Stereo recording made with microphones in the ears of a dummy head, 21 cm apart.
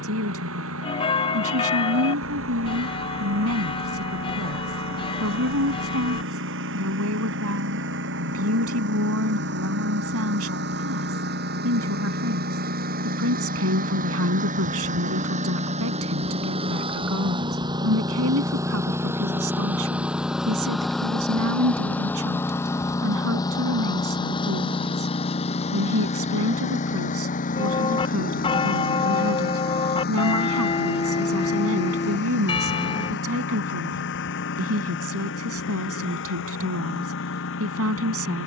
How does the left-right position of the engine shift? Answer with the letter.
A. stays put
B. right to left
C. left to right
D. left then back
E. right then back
B.